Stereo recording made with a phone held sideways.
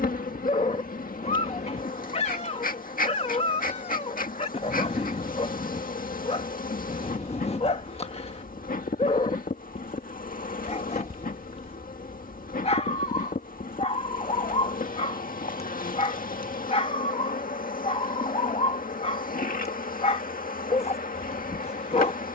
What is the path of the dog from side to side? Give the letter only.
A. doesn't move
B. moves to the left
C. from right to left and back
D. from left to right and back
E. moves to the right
A.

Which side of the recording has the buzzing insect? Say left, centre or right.
left.